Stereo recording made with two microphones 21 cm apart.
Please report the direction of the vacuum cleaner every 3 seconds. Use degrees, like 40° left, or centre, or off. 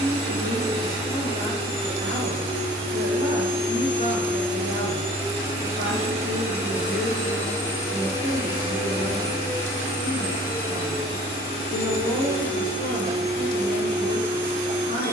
30° right, 20° right, 10° left, 40° left, 50° left.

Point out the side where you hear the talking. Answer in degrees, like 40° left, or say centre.
40° left.